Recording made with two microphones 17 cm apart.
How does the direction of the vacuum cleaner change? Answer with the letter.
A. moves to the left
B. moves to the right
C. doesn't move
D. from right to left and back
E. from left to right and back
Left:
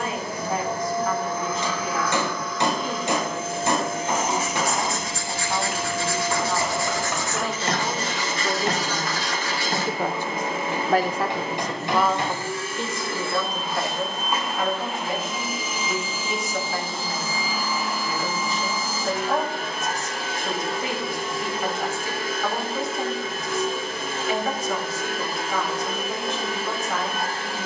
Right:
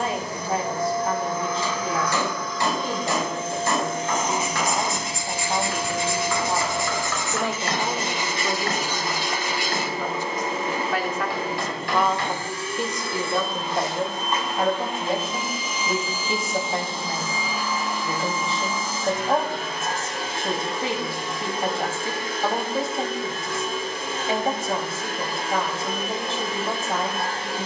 C.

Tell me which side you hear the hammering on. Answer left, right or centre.
left.